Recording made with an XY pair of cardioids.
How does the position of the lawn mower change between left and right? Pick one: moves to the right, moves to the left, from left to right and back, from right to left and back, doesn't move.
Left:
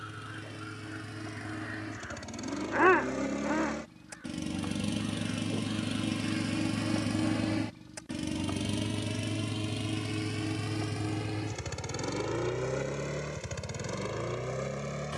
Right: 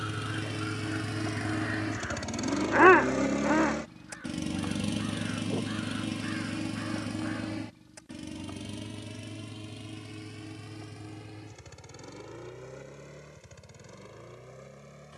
moves to the left.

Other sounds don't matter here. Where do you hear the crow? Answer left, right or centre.
right.